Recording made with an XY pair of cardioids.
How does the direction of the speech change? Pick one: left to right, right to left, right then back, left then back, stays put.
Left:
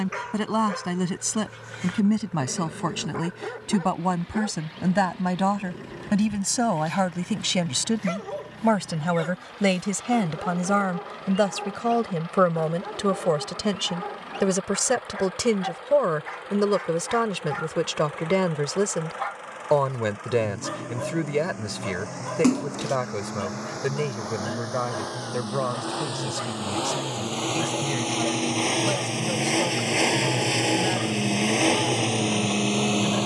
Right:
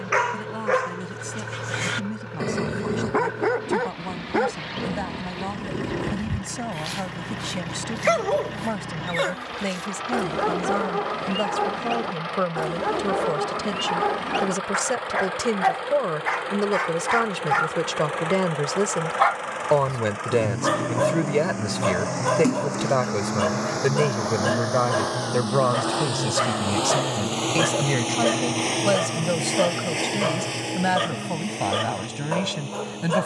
left to right.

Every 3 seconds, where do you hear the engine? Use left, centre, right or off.
right, right, right, right, right, right, right, right, right, centre, left.